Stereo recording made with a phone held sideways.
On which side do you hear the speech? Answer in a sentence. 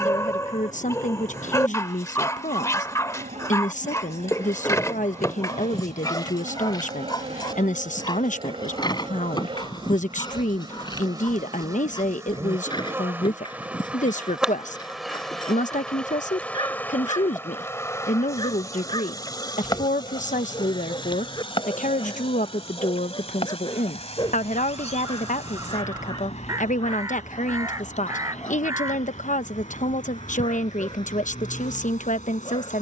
In this clip you hear the speech on the left.